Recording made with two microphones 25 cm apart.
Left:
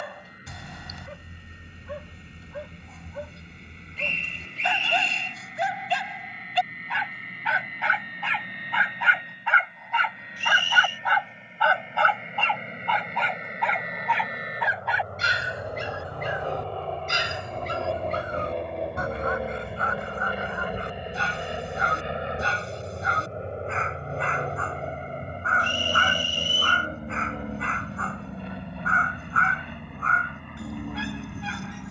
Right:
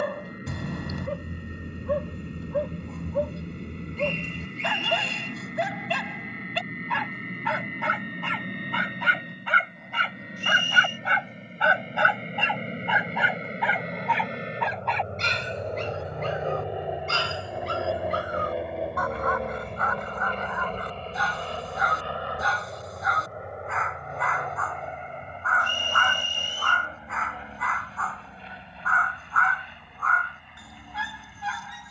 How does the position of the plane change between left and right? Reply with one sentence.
You can hear the plane move from right to left.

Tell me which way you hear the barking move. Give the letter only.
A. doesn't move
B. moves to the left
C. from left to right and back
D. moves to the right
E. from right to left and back
B.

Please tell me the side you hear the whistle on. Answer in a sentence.
You can hear the whistle on the left.